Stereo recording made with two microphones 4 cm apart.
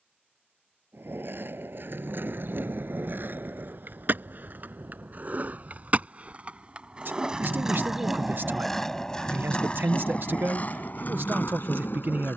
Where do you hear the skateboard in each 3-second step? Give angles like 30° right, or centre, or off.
60° right, 50° right, 20° right, 40° left.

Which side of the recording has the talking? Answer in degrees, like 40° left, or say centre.
60° right.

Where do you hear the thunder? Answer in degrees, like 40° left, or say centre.
60° right.